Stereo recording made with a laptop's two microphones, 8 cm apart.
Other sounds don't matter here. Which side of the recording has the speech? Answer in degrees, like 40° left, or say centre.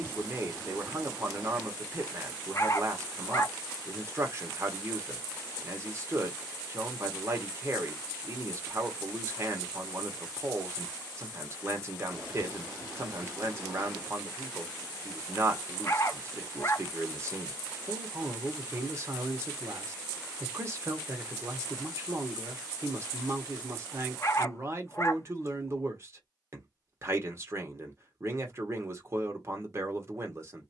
40° right.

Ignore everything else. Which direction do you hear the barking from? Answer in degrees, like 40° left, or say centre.
40° left.